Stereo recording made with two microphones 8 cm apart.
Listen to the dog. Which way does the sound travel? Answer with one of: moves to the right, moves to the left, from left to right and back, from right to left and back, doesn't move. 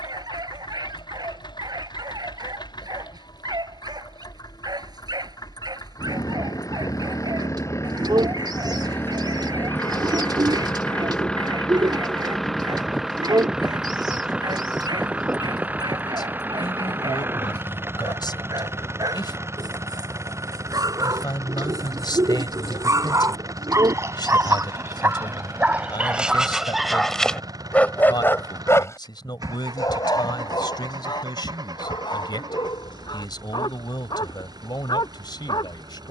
moves to the left.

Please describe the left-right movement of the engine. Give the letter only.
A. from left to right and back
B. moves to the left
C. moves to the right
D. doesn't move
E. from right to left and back
C.